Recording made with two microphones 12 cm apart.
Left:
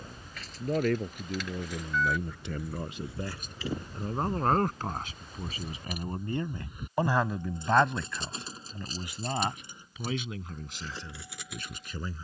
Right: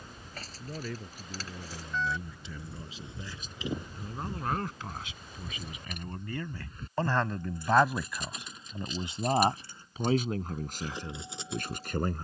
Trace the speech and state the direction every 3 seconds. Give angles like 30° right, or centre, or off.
60° left, 50° left, centre, 40° right.